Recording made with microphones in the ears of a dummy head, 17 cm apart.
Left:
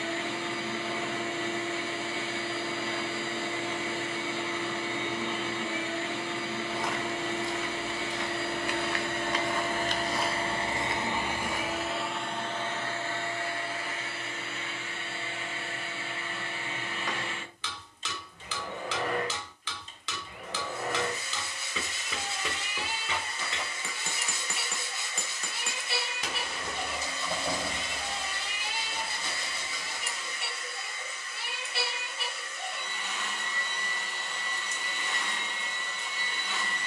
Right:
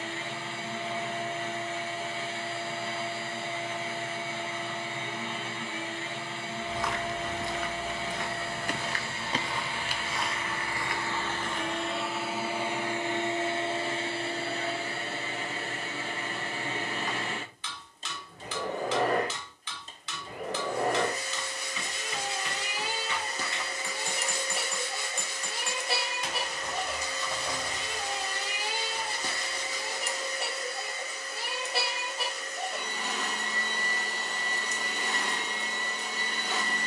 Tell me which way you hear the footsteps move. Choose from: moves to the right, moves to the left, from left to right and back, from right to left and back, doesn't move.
moves to the left.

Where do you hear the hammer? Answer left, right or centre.
left.